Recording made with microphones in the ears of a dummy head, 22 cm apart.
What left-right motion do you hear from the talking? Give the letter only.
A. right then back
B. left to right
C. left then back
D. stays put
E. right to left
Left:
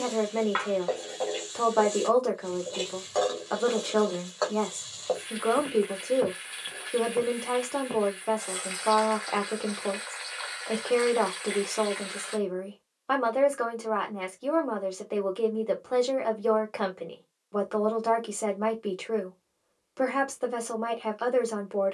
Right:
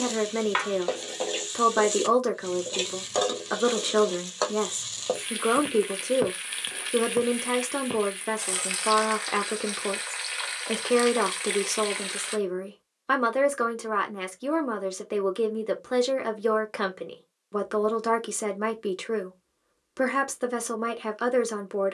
D.